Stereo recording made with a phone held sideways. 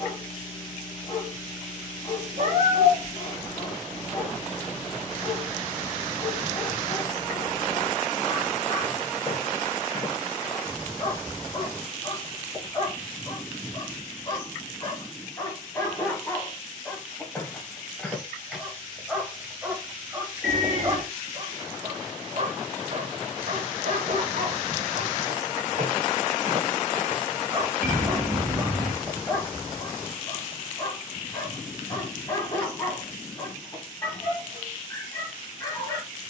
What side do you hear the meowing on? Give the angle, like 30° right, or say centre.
80° right.